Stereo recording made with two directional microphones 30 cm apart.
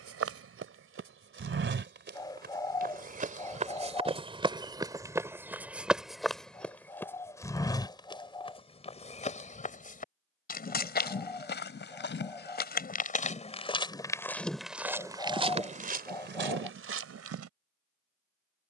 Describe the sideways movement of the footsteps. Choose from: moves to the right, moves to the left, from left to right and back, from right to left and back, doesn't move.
from right to left and back.